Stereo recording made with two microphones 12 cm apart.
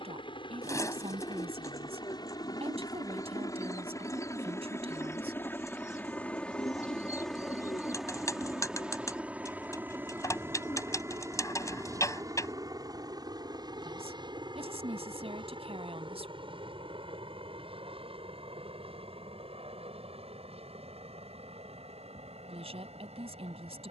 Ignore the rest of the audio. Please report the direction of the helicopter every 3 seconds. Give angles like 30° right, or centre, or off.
40° left, 20° left, centre, 20° right, 30° right, 50° right, 50° right, 60° right.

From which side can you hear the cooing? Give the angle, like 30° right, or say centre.
30° left.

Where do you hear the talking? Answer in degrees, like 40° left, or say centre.
60° right.